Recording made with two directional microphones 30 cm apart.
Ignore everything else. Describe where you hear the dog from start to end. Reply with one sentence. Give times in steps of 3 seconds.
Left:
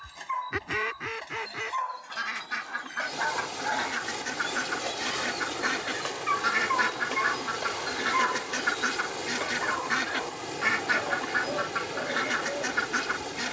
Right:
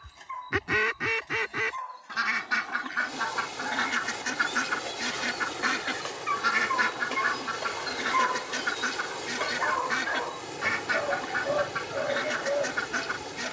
In this clip you hear the dog on the left from 0 s, in the centre from 6 s and on the right from 9 s.